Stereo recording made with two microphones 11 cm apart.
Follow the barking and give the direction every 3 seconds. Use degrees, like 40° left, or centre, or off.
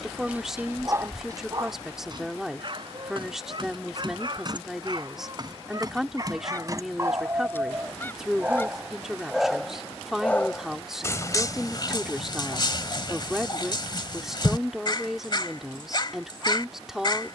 30° right, 40° right, 20° right, 20° left, 40° left, 40° left.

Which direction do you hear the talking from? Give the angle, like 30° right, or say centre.
centre.